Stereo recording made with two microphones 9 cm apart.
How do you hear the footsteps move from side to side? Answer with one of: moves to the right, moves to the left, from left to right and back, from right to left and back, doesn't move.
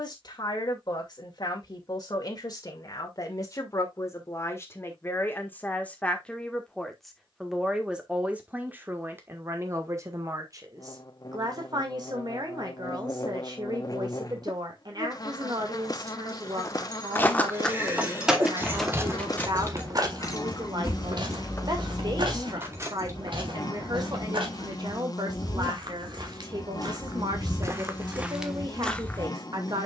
from left to right and back.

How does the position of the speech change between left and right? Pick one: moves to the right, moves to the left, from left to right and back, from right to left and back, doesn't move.
moves to the right.